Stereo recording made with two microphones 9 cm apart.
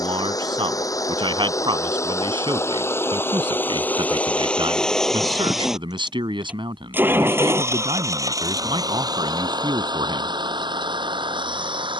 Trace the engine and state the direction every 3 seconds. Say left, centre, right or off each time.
left, centre, right, right.